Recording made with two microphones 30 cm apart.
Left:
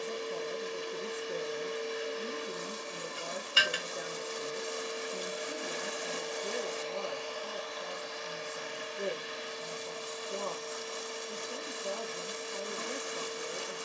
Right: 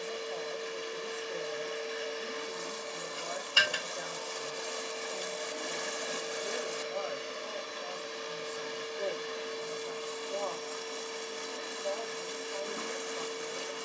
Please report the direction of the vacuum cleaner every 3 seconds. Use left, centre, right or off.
left, left, right, right, right.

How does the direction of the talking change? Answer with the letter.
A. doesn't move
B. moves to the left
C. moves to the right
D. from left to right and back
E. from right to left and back
A.